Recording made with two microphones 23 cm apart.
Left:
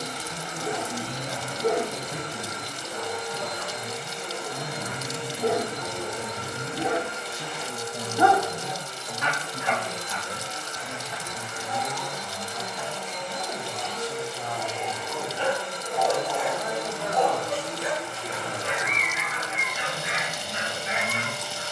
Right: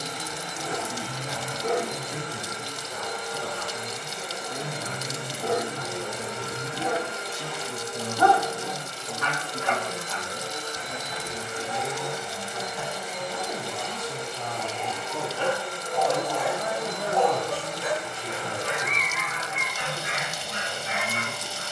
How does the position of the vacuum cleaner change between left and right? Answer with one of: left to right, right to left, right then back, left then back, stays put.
right then back.